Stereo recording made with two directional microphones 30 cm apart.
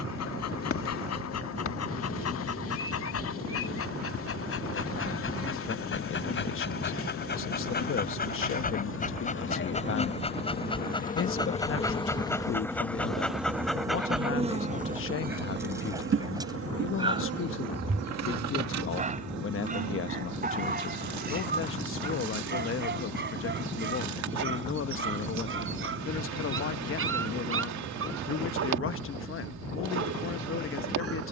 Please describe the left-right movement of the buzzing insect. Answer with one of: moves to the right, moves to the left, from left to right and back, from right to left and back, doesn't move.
moves to the right.